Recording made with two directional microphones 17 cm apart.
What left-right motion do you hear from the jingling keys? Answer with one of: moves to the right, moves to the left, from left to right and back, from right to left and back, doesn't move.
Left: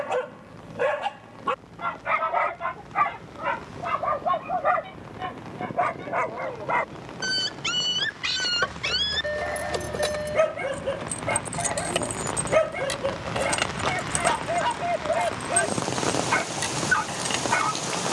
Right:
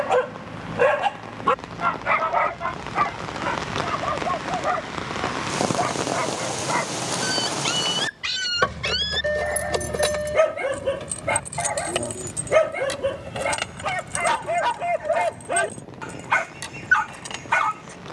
moves to the left.